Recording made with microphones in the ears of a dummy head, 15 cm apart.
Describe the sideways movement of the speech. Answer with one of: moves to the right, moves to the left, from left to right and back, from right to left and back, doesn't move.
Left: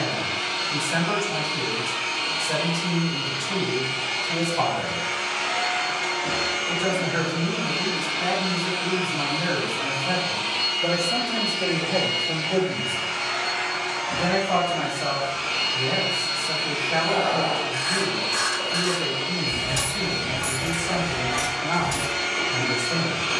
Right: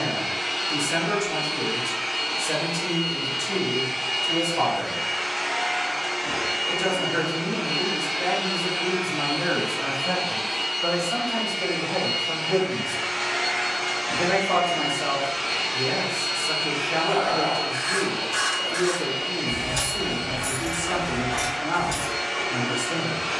from right to left and back.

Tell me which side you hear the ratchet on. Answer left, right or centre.
centre.